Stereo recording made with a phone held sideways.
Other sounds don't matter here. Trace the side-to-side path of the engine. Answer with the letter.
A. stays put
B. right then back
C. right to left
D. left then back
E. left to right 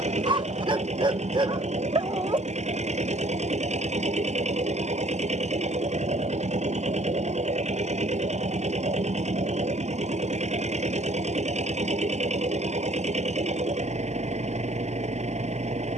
A.